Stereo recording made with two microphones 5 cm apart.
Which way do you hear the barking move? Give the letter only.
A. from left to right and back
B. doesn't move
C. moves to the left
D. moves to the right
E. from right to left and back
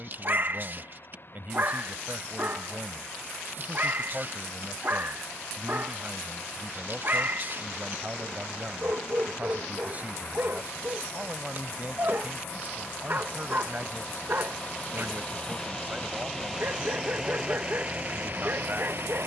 B.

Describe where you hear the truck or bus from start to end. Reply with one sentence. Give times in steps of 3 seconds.
You can hear the truck or bus on the left from 0 s, in the centre from 15 s and on the right from 18 s.